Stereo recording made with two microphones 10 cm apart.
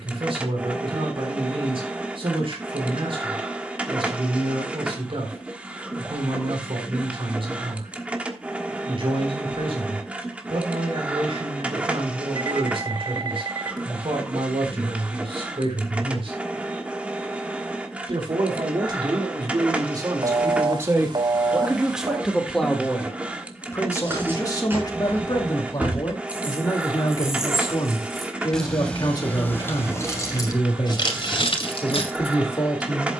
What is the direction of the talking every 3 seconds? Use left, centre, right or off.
right, right, right, right, right, right, right, centre, left, left, left.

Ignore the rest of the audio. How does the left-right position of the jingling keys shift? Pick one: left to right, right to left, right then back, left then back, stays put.
right to left.